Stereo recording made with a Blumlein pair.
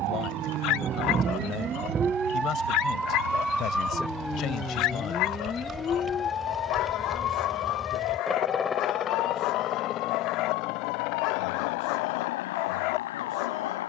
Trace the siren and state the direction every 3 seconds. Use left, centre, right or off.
right, centre, left, left, left.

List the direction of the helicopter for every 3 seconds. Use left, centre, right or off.
right, right, centre, left, left.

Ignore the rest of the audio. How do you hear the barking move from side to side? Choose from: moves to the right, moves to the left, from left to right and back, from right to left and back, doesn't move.
doesn't move.